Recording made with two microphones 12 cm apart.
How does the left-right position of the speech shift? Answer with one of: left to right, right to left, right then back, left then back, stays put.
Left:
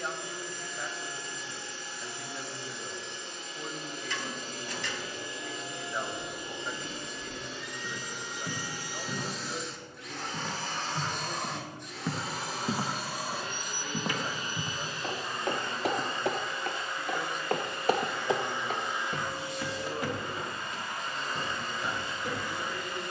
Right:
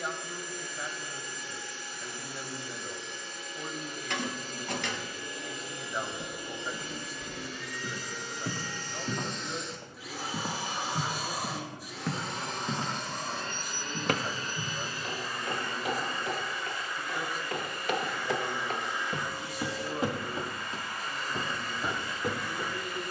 stays put.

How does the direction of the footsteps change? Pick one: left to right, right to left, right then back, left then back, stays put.
left then back.